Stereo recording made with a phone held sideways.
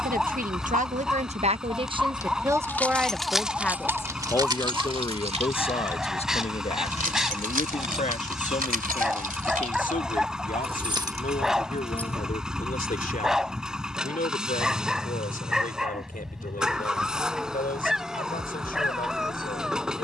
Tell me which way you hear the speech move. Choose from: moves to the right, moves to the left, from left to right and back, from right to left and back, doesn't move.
moves to the left.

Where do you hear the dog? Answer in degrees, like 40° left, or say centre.
centre.